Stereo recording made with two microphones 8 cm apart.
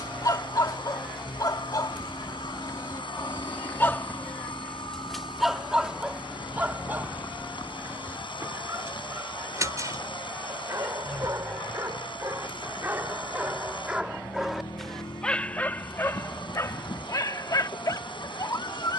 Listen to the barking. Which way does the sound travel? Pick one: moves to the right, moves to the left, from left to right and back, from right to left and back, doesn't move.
from left to right and back.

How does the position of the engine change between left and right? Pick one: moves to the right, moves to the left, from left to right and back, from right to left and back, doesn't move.
doesn't move.